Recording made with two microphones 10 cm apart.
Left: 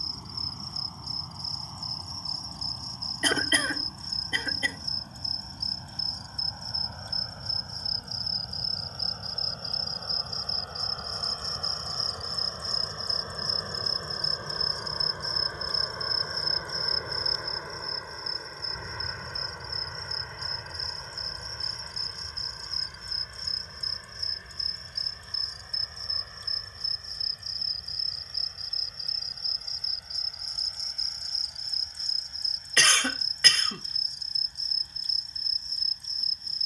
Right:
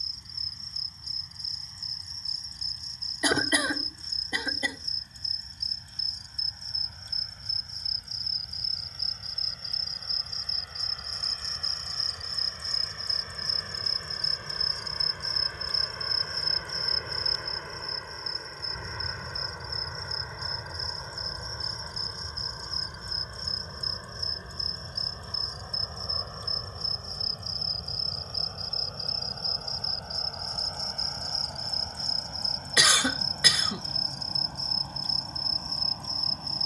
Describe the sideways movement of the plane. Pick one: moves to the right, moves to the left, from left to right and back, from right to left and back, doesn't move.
moves to the right.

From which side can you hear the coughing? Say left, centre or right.
centre.